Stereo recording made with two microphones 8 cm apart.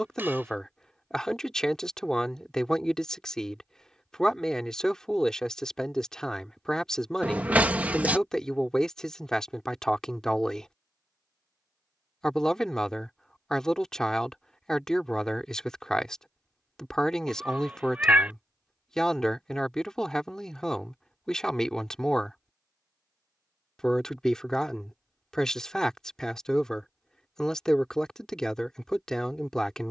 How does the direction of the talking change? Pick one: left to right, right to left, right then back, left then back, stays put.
stays put.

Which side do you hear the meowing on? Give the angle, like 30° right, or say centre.
20° right.